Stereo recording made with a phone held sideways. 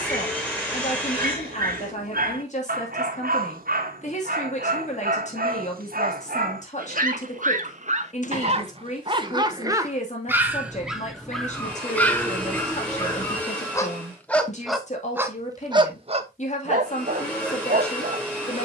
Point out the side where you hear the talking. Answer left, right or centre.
left.